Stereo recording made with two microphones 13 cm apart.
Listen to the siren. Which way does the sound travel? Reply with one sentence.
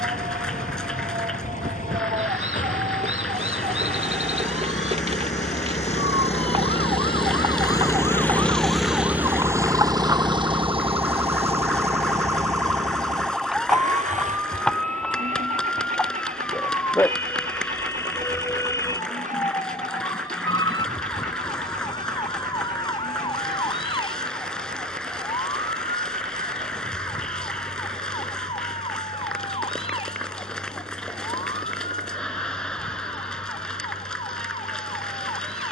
You can hear the siren travel towards the left.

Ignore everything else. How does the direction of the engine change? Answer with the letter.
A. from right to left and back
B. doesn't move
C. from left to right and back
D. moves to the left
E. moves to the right
E.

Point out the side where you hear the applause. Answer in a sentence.
You can hear the applause in the centre.